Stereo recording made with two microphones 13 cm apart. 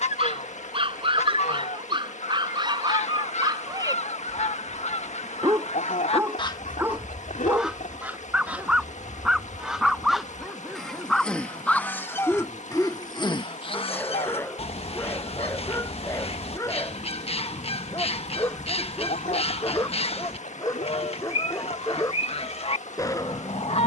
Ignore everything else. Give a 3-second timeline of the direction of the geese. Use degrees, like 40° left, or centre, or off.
60° left, 60° left, 10° left, centre, 40° left, 50° left, 50° left, 50° left.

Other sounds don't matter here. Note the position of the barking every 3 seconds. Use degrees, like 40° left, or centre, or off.
40° right, 30° right, 10° right, centre, 10° left, 20° left, 30° left, 30° left.